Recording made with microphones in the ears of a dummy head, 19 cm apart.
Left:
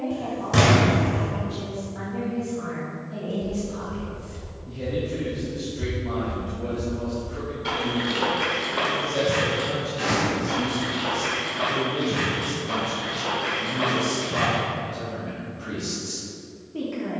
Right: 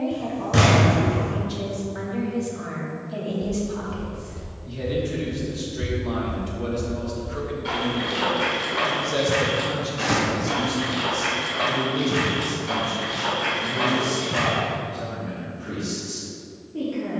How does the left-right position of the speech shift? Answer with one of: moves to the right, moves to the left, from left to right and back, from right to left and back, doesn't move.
moves to the left.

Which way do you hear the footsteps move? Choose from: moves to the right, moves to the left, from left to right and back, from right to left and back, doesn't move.
moves to the right.